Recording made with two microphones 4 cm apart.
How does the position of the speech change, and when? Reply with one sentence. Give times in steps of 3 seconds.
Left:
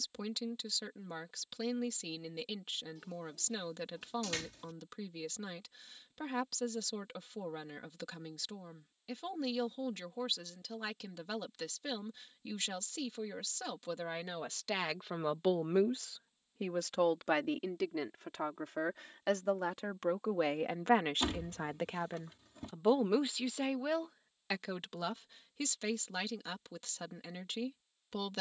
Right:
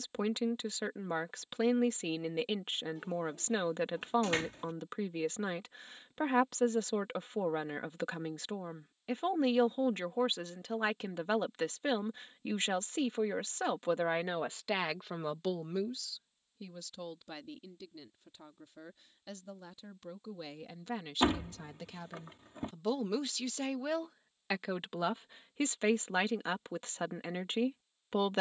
You can hear the speech on the right from 0 s, on the left from 15 s and on the right from 24 s.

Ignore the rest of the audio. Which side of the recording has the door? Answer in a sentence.
In this clip you hear the door on the right.